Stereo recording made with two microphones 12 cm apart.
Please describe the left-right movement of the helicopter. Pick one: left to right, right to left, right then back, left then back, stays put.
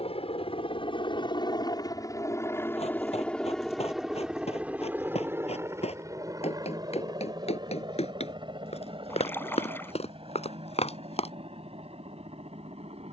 left to right.